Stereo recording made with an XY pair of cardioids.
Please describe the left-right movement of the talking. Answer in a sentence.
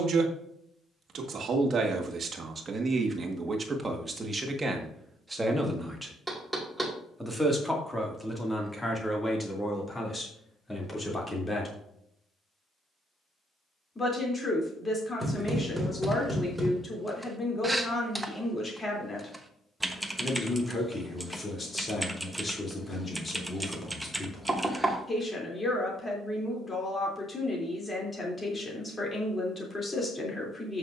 You can hear the talking go from the right side to the left.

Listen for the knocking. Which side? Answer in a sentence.
In this clip you hear the knocking in the centre.